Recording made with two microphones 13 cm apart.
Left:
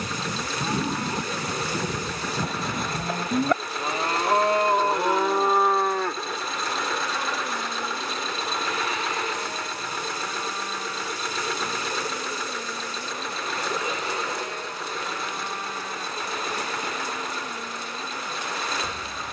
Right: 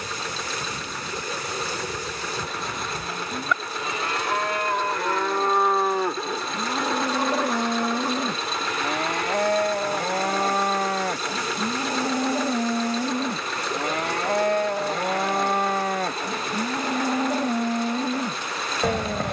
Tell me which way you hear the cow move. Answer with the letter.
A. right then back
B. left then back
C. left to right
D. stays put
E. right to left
C.